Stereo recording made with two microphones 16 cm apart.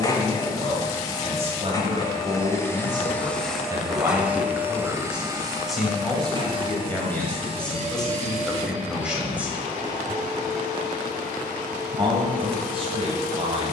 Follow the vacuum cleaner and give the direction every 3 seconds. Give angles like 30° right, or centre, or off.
20° left, 10° right, 40° right, 50° right, 60° right.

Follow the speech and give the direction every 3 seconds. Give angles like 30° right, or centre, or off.
40° right, 10° right, centre, 10° right, 40° right.